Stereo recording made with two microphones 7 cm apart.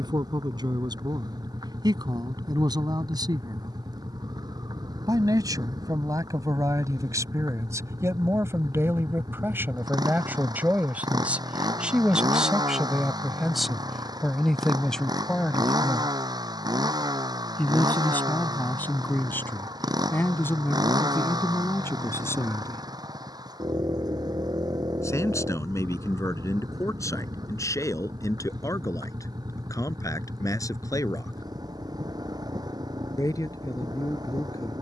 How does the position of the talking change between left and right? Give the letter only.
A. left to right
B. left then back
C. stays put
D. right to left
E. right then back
D.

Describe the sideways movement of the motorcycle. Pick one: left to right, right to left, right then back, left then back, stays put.
stays put.